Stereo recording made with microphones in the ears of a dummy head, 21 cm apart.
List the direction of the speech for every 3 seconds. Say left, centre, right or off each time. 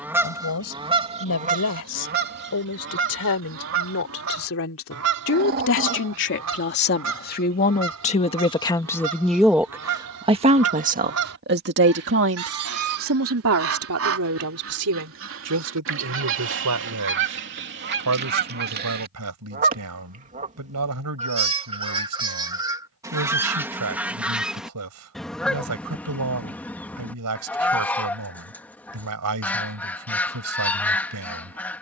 left, left, left, right, right, right, right, right, right, right, right.